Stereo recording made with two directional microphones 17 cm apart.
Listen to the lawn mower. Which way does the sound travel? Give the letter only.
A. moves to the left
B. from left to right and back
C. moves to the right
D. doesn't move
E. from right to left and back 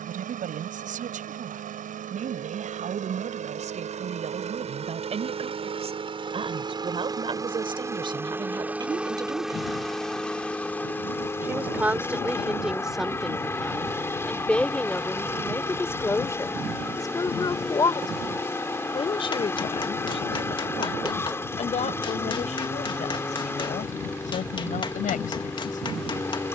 A.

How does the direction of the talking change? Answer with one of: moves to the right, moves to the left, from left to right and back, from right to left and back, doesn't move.
moves to the left.